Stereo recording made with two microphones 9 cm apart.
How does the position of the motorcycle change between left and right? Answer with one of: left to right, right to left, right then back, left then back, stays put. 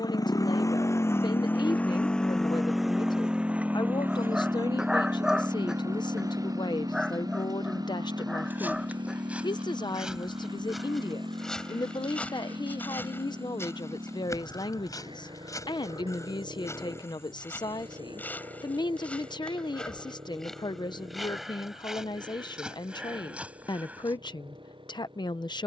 left to right.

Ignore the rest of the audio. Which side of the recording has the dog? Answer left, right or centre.
centre.